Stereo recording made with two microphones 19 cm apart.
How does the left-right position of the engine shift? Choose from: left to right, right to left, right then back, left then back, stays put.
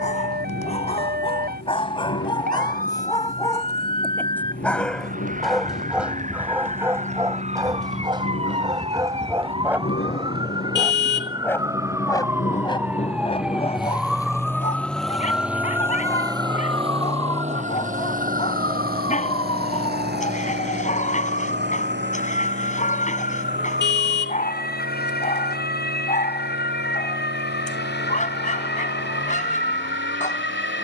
left to right.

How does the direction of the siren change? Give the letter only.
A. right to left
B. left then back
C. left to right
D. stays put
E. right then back
A.